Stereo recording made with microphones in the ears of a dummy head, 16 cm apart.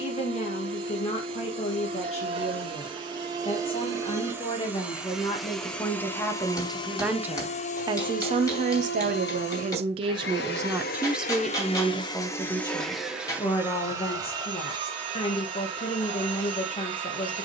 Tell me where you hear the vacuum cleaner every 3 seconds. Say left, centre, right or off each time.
right, centre, left, left, centre, right.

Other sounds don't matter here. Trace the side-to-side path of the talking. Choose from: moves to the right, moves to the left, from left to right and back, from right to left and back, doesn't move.
from left to right and back.